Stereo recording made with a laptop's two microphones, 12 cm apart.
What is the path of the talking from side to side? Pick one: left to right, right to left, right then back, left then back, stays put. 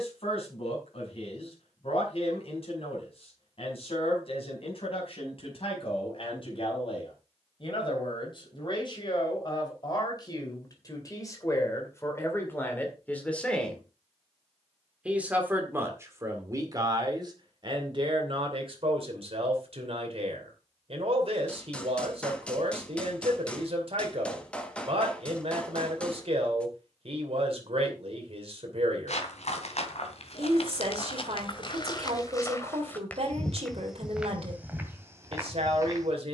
left to right.